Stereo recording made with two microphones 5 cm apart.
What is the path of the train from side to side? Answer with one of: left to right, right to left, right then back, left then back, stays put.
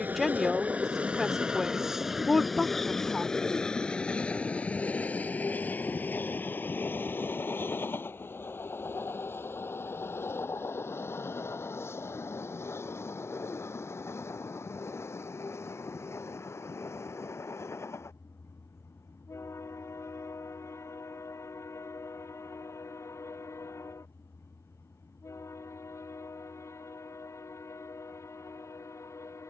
right to left.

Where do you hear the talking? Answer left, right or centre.
centre.